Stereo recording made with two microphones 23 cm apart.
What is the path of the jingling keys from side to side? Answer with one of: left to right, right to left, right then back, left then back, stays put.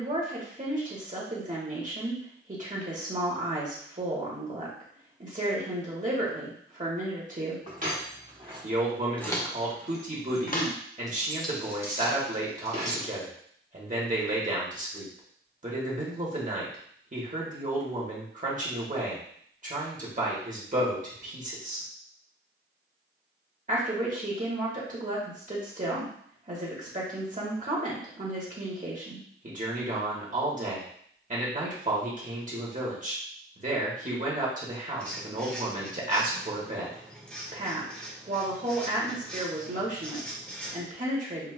left then back.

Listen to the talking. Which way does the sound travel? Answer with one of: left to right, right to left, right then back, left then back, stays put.
stays put.